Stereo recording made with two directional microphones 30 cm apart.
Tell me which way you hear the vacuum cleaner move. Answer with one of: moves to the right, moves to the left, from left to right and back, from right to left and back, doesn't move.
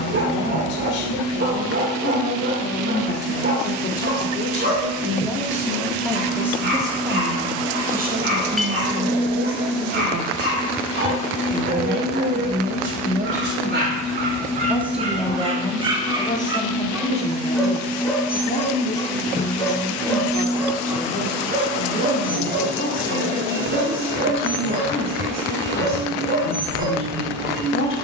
from right to left and back.